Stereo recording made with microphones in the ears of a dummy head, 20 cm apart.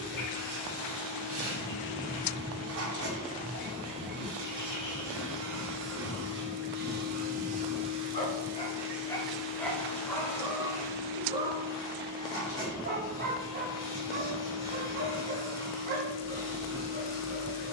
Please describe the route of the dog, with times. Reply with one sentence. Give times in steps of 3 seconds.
In this clip you hear the dog on the left from 0 s, in the centre from 9 s and on the right from 12 s.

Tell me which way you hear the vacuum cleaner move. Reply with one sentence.
You can hear the vacuum cleaner travel towards the left.